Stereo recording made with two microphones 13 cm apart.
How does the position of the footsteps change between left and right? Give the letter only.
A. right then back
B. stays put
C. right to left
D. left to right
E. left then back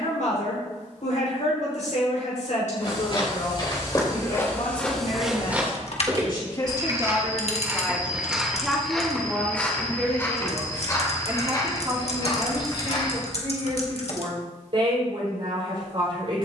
A.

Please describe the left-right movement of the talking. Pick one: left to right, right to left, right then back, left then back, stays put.
left to right.